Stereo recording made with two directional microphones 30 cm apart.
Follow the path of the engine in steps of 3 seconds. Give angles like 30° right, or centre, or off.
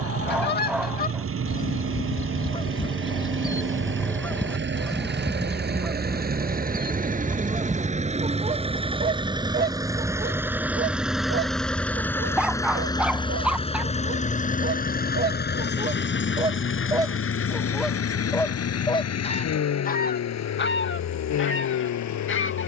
50° right, 40° right, 20° right, 10° right, 20° left, 40° left, 60° left, 70° left.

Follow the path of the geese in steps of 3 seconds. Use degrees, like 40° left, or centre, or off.
30° left, centre, 20° right, 30° right, 40° right, 20° right, 20° left, 40° left.